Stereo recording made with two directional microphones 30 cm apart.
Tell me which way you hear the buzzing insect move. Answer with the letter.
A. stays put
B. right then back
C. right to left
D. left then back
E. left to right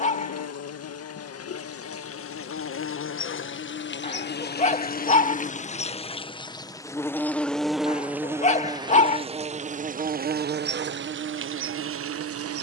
E.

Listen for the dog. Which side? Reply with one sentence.
You can hear the dog on the left.